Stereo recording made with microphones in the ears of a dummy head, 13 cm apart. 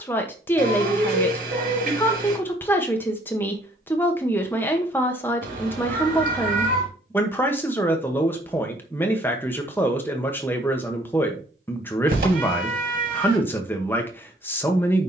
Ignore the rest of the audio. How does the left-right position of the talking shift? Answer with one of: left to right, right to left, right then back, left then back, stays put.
stays put.